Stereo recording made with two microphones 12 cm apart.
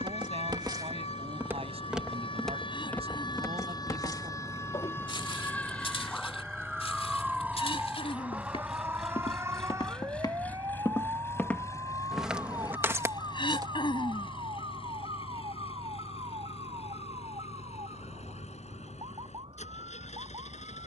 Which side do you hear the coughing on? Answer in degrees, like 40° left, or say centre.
40° left.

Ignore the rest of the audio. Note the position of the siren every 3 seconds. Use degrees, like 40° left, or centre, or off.
60° left, 30° left, 10° right, 20° right, 40° right, 40° right, 50° right.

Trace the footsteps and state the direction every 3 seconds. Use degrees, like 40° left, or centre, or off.
20° right, 40° left, 60° left, 30° left, 20° right, off, off.